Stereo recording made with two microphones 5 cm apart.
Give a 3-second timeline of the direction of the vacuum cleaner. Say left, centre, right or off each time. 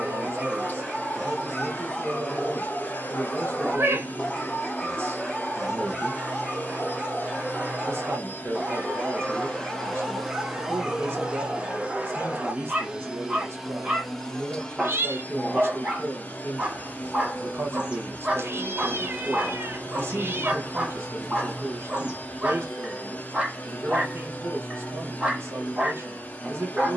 left, left, left, centre, centre, left, left, left, left.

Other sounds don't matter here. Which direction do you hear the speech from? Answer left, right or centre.
right.